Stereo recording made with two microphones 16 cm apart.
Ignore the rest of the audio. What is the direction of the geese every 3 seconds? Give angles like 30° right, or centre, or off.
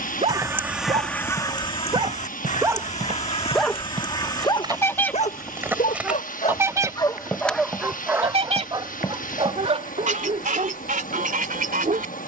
20° left, 20° left, 30° right, 60° right.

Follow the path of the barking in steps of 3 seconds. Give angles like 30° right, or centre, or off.
30° right, 30° left, 10° left, 40° right.